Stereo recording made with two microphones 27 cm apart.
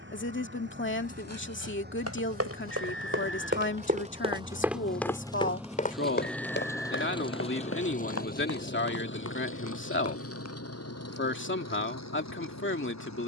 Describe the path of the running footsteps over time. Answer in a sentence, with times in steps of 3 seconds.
In this clip you hear the running footsteps on the right from 0 s, in the centre from 3 s, on the left from 6 s and not at all from 12 s.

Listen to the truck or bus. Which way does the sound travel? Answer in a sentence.
You can hear the truck or bus go from the right side to the left.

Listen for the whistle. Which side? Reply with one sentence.
You can hear the whistle on the left.